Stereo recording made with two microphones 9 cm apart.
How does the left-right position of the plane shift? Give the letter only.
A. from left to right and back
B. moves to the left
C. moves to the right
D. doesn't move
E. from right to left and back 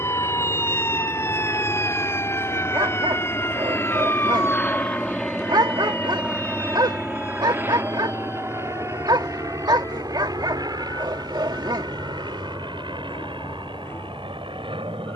C.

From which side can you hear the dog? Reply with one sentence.
In this clip you hear the dog on the right.